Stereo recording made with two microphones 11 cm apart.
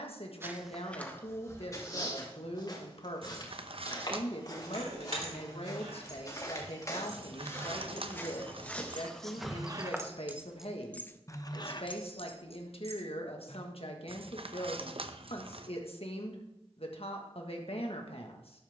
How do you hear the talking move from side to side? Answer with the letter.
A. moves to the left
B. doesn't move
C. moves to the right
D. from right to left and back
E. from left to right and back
B.